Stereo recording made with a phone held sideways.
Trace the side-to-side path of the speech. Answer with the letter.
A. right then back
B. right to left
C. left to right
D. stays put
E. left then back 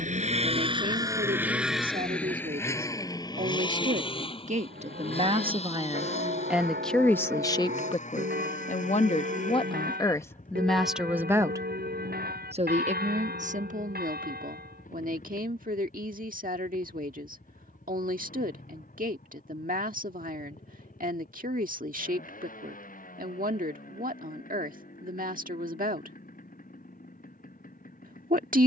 E.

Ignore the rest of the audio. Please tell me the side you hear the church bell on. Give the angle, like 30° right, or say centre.
80° right.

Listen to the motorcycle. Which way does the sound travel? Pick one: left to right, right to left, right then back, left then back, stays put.
right to left.